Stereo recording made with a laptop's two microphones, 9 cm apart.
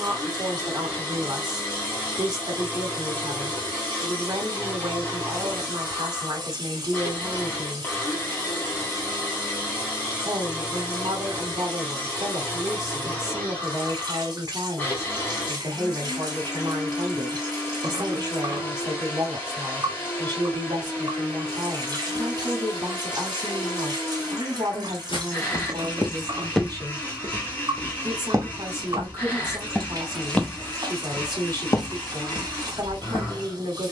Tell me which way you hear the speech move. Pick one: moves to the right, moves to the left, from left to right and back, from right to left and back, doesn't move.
doesn't move.